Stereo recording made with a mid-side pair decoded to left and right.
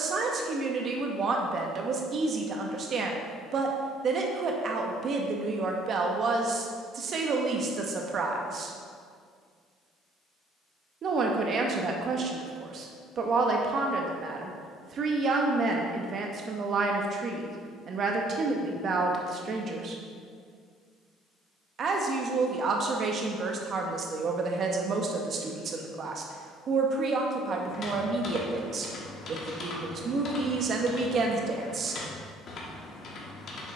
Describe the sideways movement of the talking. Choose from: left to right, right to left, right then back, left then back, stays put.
stays put.